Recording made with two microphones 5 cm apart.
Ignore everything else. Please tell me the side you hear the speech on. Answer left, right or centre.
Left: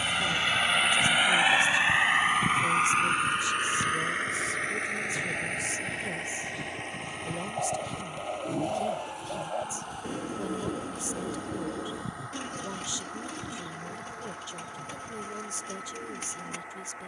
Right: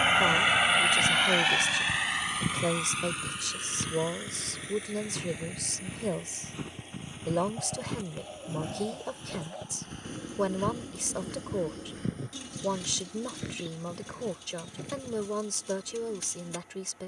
right.